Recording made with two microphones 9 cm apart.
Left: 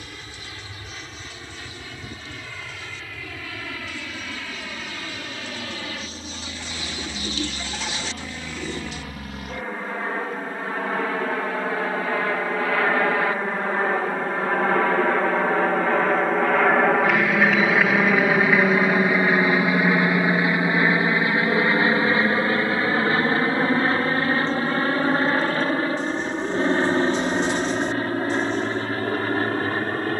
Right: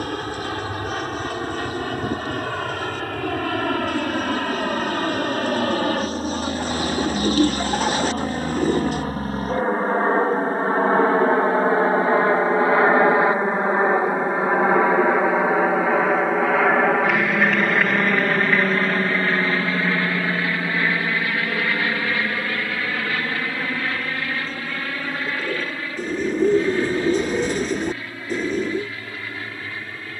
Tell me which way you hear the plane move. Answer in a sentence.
In this clip you hear the plane go from the right side to the left.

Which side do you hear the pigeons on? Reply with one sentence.
In this clip you hear the pigeons on the right.